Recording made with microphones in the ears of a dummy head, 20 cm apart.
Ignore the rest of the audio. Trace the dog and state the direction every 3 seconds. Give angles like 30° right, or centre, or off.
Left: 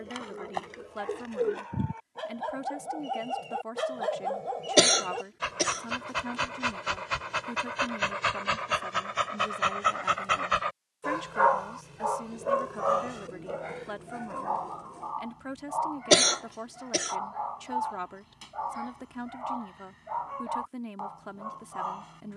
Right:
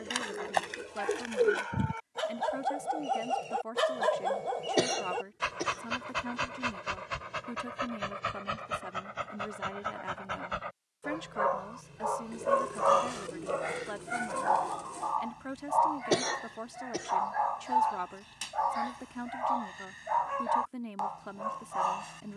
50° right, 20° right, 30° left, 50° left, 30° right, 50° right, 50° right, 50° right.